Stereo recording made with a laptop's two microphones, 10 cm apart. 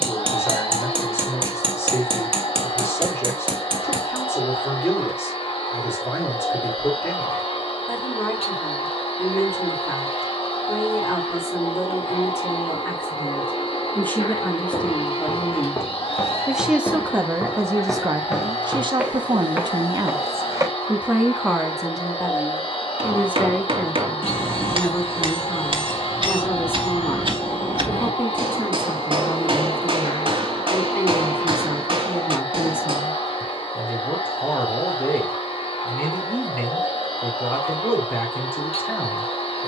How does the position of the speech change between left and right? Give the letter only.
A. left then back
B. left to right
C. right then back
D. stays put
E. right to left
C.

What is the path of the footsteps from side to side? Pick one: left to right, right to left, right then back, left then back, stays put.
left to right.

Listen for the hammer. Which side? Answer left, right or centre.
right.